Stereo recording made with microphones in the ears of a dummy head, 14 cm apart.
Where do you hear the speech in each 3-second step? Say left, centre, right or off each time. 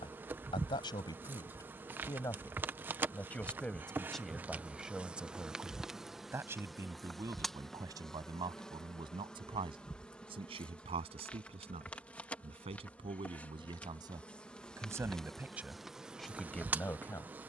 left, centre, right, right, right, centre.